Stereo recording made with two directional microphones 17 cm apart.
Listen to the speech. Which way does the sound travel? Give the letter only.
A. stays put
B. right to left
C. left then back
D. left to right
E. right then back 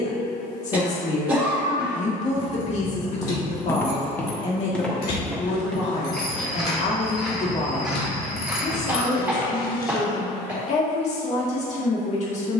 A.